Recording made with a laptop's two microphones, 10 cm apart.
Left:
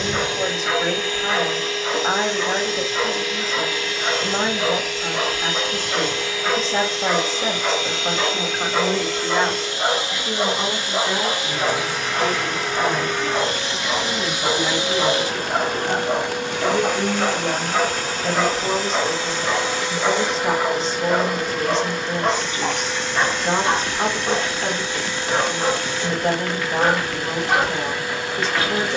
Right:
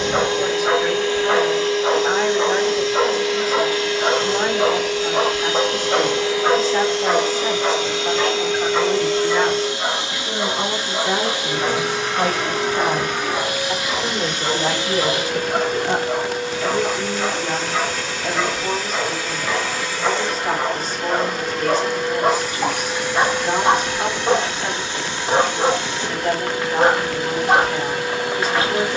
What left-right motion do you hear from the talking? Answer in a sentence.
In this clip you hear the talking move from left to right and back again.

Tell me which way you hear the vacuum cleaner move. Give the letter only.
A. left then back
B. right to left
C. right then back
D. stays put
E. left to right
A.